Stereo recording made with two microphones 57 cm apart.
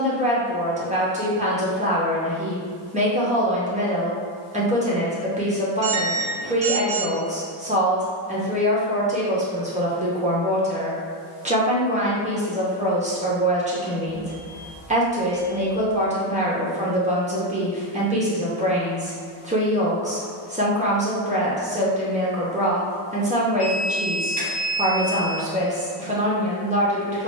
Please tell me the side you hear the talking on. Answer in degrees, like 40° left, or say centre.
10° right.